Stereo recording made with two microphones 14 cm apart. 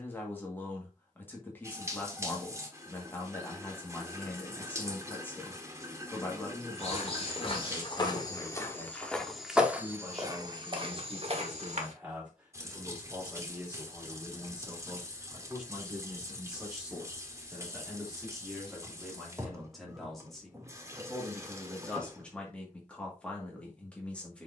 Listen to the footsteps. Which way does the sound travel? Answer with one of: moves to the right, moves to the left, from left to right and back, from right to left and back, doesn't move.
moves to the right.